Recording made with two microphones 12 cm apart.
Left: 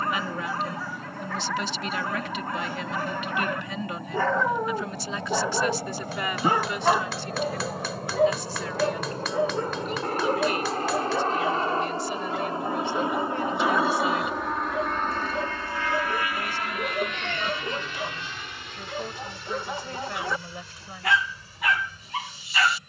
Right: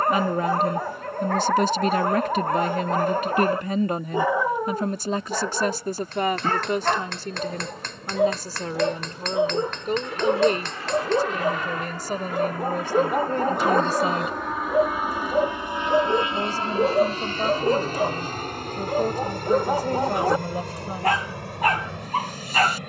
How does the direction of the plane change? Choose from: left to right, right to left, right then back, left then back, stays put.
left to right.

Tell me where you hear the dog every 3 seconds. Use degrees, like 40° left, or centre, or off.
50° right, 10° right, centre, 30° right, 40° right, 40° right, 40° right, 40° right.